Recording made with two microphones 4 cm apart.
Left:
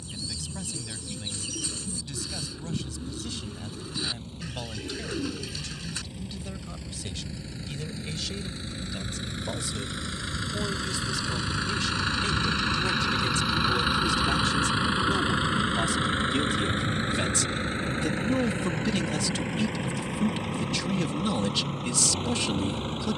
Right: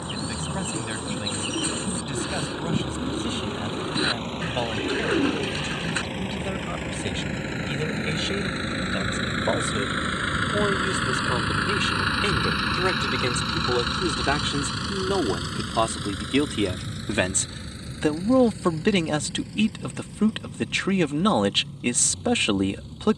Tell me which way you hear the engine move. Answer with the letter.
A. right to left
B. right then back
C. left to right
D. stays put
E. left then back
A.